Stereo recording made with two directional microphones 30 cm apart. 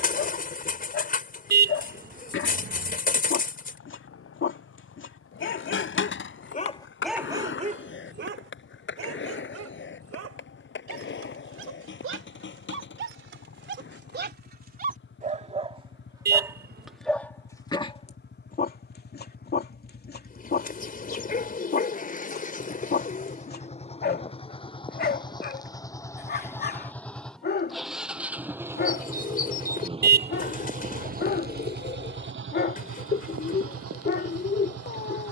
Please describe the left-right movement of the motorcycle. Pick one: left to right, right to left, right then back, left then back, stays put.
left to right.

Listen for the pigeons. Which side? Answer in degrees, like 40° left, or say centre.
30° left.